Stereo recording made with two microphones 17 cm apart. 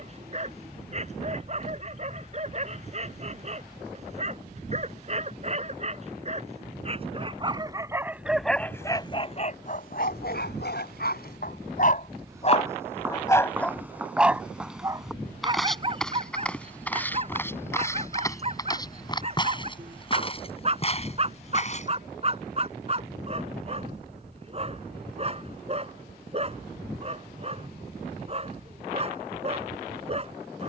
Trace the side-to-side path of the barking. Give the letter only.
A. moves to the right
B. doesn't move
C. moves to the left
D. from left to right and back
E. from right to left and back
E.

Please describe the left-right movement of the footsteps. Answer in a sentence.
In this clip you hear the footsteps go from the right side to the left.